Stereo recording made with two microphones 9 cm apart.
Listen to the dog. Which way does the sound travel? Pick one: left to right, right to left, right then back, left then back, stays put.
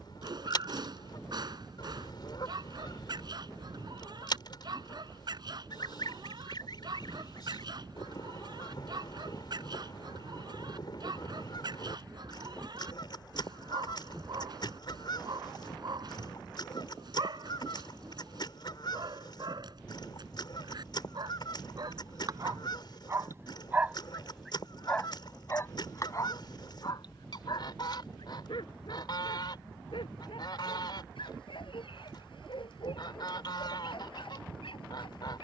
right to left.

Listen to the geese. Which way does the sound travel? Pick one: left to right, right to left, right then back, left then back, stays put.
stays put.